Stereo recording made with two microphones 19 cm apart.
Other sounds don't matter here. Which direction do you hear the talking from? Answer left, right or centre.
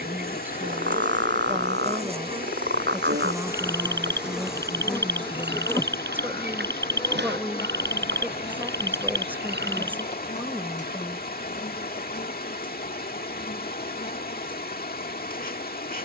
centre.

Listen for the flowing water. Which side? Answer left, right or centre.
left.